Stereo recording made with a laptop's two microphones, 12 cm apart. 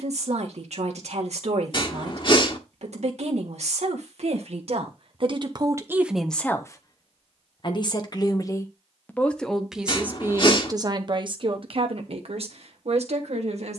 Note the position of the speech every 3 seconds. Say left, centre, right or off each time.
right, right, left, right, right.